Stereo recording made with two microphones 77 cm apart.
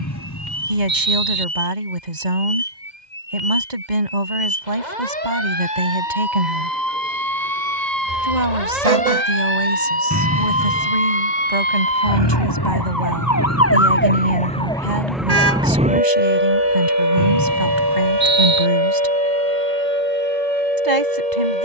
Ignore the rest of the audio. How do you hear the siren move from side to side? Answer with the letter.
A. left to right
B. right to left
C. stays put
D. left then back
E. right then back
A.